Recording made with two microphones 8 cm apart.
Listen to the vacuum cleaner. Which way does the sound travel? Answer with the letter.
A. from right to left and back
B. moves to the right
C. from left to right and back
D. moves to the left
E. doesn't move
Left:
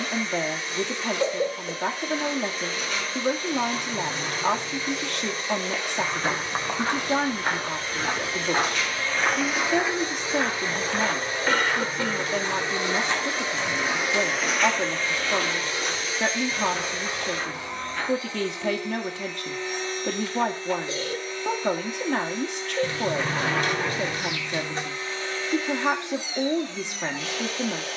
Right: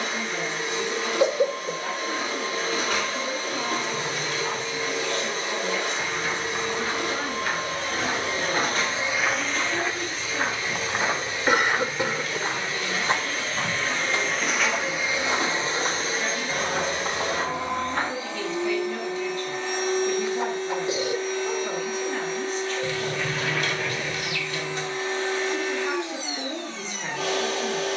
A.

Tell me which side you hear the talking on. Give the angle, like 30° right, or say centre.
80° left.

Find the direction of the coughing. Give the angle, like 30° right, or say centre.
20° right.